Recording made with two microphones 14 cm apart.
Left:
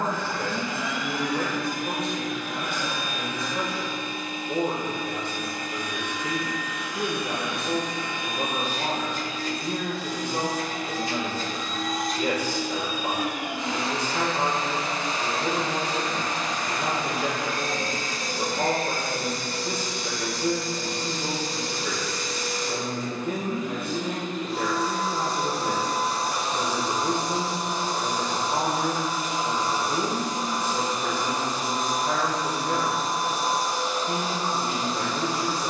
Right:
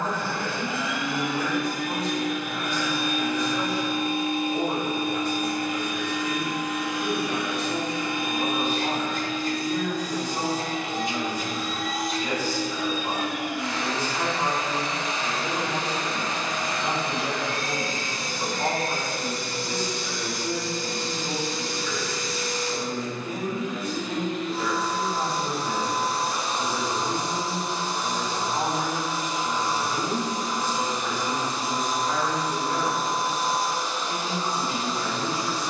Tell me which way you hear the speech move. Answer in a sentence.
You can hear the speech stay in one place.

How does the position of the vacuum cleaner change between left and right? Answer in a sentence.
You can hear the vacuum cleaner move from right to left.